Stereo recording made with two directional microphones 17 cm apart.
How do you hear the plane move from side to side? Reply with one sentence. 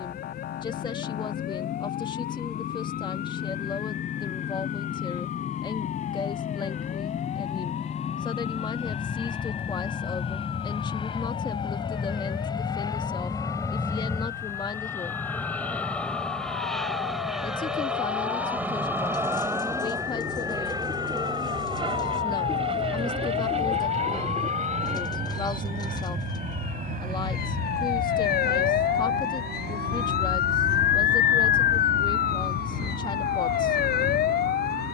In this clip you hear the plane move to the right.